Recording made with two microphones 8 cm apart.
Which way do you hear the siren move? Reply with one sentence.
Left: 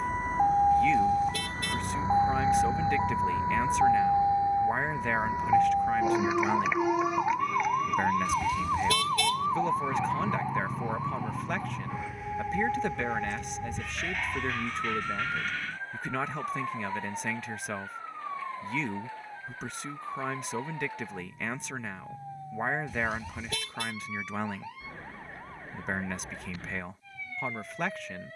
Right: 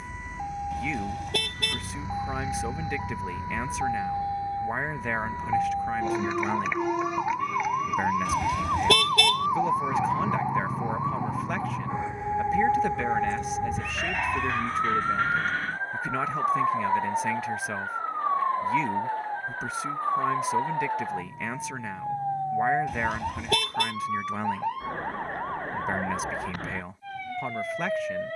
You can hear the siren travel towards the right.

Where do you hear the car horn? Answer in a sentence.
You can hear the car horn on the right.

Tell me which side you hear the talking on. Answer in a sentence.
You can hear the talking in the centre.